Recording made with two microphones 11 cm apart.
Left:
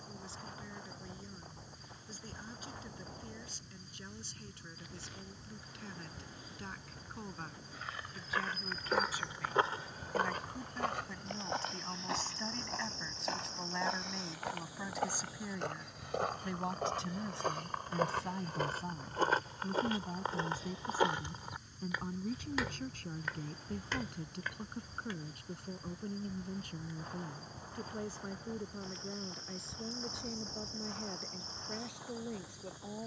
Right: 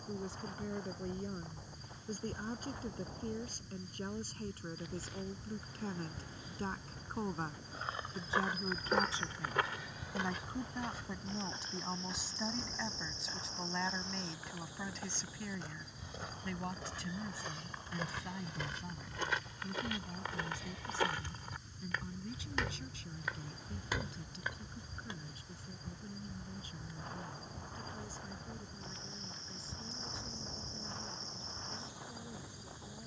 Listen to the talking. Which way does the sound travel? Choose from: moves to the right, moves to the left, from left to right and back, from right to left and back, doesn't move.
moves to the left.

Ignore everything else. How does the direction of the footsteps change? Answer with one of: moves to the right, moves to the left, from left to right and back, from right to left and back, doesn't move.
from right to left and back.